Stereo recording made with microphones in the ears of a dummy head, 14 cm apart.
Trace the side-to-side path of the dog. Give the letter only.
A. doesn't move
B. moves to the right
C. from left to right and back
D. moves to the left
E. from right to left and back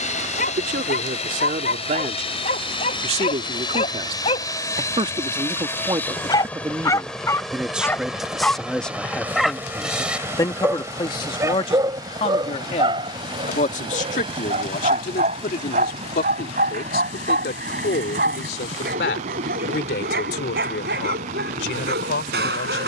B.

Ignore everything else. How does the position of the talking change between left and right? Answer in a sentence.
In this clip you hear the talking move to the left.